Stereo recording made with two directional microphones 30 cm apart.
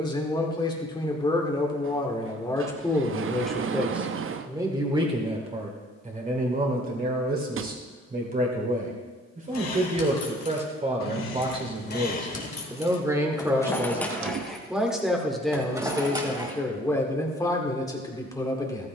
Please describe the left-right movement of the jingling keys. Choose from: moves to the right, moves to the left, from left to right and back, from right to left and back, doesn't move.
moves to the right.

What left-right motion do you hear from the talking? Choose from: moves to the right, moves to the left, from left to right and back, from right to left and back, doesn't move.
from left to right and back.